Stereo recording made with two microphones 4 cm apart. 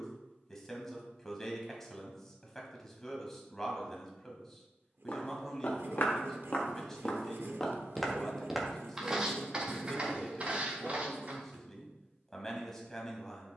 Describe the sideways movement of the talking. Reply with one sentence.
You can hear the talking stay in one place.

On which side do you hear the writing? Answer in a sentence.
You can hear the writing on the right.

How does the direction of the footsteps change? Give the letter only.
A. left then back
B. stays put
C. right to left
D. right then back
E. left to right
E.